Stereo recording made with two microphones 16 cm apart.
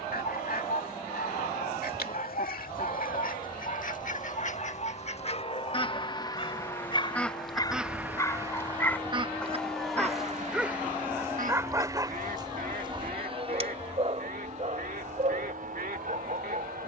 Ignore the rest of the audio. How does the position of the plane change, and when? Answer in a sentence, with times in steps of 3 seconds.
You can hear the plane on the left from 0 s, in the centre from 9 s and on the right from 12 s.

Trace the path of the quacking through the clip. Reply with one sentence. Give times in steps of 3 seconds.
You can hear the quacking on the left from 0 s, in the centre from 6 s and on the right from 9 s.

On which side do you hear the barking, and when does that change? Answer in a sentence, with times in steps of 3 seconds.
You can hear the barking on the left from 0 s, in the centre from 9 s and on the right from 12 s.